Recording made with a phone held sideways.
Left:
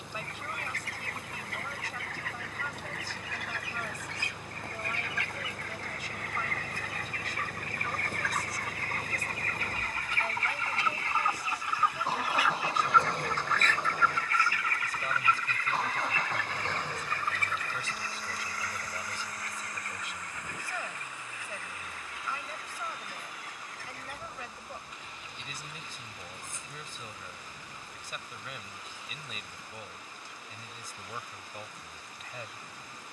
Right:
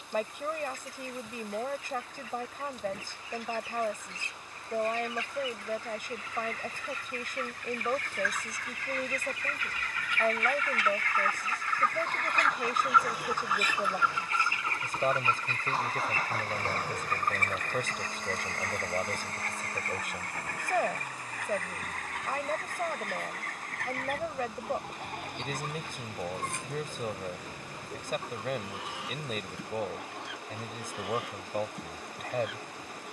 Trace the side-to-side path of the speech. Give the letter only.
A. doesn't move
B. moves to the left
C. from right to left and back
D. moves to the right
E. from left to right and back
A.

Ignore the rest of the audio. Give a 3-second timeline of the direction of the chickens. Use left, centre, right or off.
left, left, left, left, centre, right, right, right, right, right, right.